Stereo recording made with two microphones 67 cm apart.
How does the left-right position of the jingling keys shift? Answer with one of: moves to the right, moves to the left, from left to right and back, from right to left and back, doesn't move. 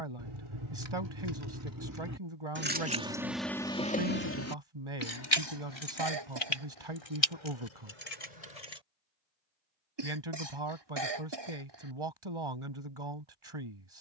moves to the left.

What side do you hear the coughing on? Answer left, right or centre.
right.